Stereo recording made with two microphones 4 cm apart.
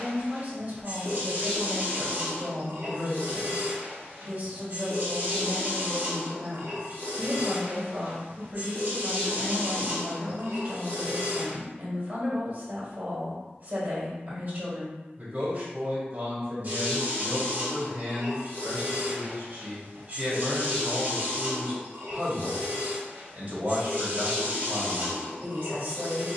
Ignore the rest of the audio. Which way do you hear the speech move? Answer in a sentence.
You can hear the speech stay in one place.